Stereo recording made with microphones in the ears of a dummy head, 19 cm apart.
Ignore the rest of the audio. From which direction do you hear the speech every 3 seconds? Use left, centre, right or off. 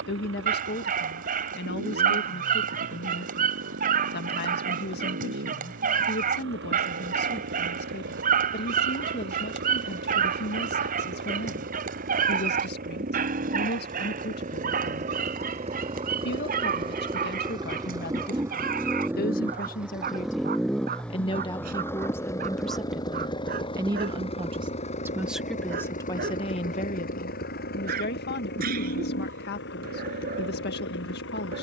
left, left, left, left, left, left, left, centre, centre, left, left.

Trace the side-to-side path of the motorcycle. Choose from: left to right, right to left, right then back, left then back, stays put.
right to left.